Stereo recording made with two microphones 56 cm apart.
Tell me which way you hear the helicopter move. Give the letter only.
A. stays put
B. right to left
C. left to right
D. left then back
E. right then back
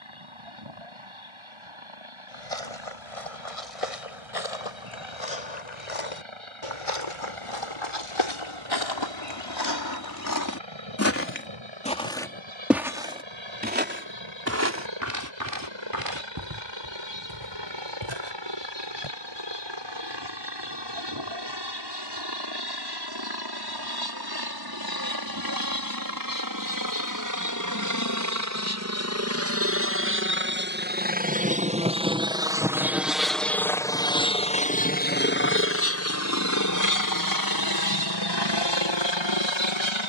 B.